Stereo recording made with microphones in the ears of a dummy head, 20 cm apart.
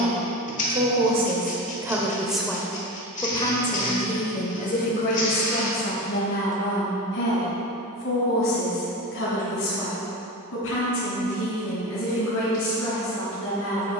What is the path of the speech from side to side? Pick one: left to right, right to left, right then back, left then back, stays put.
right to left.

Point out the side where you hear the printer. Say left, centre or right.
left.